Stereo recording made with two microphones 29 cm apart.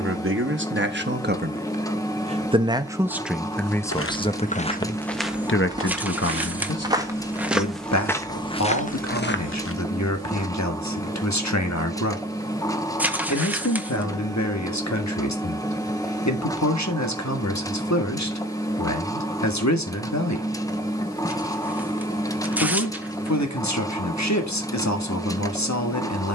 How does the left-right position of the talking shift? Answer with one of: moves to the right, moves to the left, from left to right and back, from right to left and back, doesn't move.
moves to the left.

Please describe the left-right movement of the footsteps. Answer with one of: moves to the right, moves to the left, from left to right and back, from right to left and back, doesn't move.
from left to right and back.